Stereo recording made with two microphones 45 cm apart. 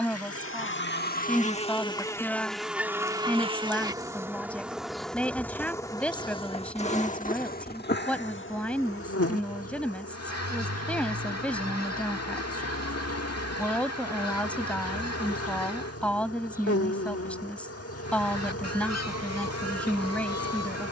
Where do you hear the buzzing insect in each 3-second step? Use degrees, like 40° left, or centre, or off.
10° left, centre, 20° left, 30° left, 30° left, 30° left, 30° left.